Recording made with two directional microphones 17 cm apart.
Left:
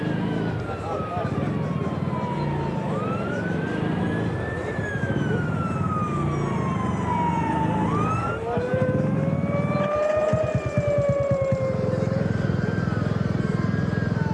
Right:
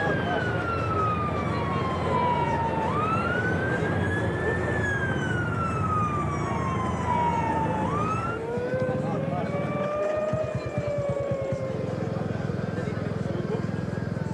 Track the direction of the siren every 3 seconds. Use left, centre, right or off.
right, right, centre, left, left.